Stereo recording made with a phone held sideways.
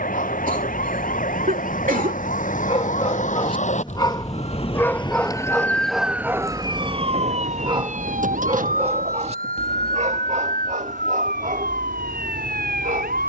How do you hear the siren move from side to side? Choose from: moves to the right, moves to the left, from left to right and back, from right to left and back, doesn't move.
moves to the right.